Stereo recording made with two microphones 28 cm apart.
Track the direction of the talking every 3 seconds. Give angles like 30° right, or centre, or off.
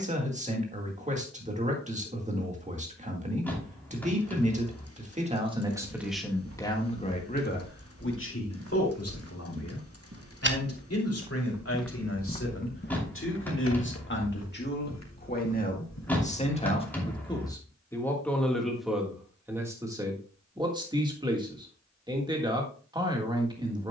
30° right, 20° right, 30° left, 60° left, 40° left, 20° left, 10° right, 20° right.